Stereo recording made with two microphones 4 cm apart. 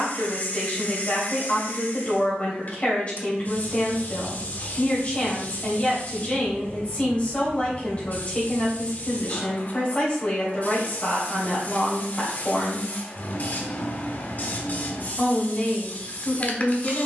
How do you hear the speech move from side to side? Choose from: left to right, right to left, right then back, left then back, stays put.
stays put.